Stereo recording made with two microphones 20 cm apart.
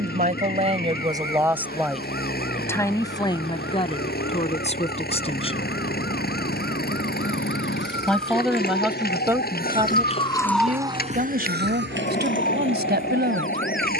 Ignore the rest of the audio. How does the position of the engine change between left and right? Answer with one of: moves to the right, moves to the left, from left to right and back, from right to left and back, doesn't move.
doesn't move.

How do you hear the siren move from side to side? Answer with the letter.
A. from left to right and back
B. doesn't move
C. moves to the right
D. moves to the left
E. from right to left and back
C.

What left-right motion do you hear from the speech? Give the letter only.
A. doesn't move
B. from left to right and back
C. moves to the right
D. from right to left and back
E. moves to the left
D.